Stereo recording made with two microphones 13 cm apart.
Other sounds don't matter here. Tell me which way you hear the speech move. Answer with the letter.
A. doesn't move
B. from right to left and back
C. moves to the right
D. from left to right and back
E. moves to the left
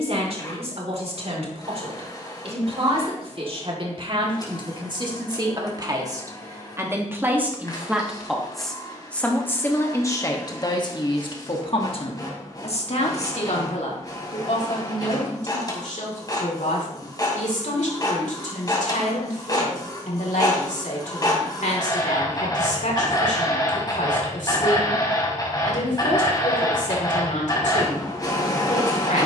E.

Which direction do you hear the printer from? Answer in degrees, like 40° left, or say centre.
30° left.